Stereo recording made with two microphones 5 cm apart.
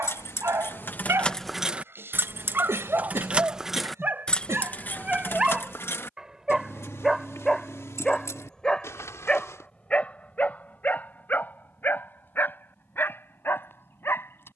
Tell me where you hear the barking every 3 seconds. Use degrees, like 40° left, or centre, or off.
50° right, 30° right, centre, 30° left, 50° left.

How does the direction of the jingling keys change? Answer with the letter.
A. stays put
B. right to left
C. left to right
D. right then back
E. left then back
D.